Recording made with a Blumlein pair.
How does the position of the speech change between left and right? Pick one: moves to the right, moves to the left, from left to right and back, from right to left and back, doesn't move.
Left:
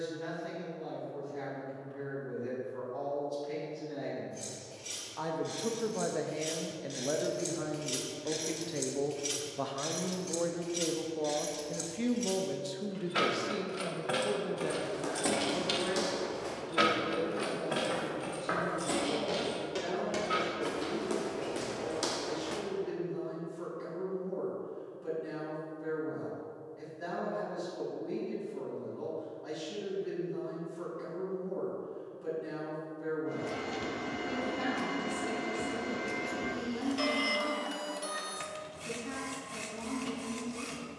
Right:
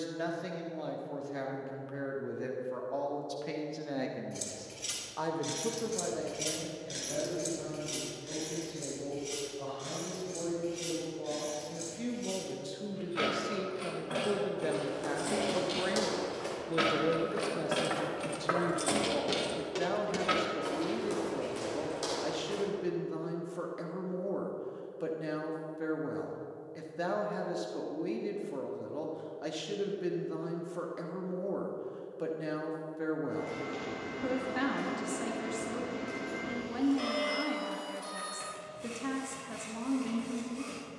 from right to left and back.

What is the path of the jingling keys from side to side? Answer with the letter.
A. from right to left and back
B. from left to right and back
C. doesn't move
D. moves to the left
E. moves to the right
A.